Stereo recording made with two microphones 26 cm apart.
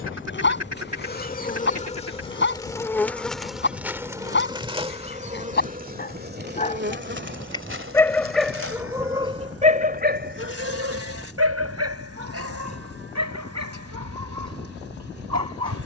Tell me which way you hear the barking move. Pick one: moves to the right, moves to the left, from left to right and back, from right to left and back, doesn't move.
moves to the right.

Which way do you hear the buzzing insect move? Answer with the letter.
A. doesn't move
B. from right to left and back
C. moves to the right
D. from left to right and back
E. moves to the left
C.